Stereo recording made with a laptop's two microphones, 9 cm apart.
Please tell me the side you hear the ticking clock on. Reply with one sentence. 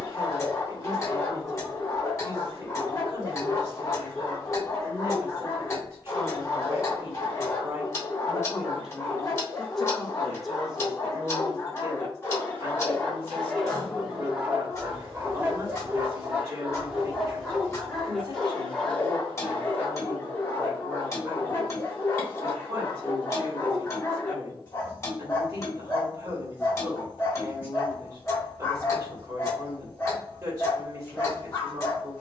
You can hear the ticking clock on the left.